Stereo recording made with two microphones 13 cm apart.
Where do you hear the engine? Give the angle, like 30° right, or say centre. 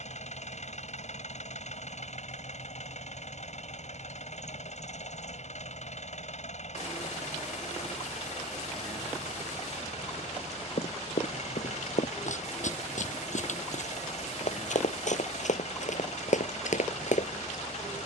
70° left.